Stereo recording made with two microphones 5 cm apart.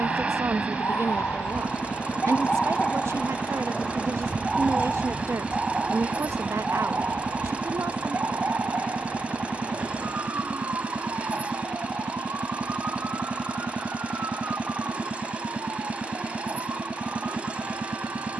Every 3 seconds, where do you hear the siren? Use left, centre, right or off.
left, centre, right, right, right, right.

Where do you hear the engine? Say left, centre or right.
right.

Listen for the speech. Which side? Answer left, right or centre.
right.